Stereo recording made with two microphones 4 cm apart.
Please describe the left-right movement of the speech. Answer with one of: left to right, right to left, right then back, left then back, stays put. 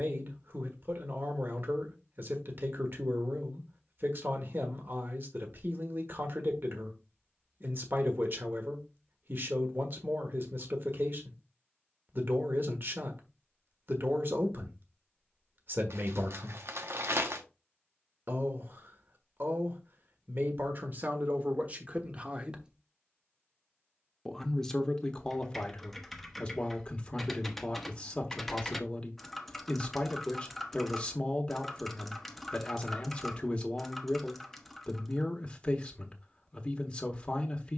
right to left.